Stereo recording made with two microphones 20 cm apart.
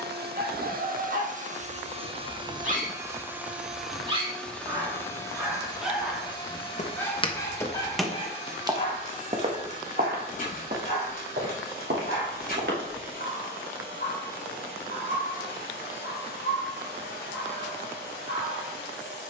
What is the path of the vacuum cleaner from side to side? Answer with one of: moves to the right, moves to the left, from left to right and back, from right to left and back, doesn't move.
moves to the left.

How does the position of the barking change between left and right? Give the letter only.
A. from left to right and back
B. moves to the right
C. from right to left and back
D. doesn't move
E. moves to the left
E.